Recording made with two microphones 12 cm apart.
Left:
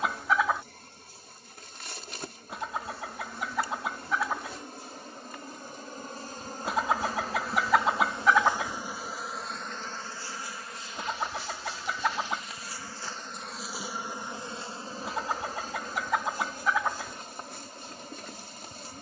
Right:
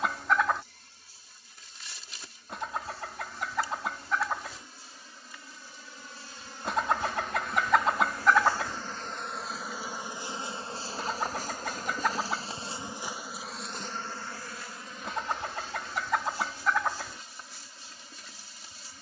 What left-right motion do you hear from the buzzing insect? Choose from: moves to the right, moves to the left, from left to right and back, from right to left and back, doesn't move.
from left to right and back.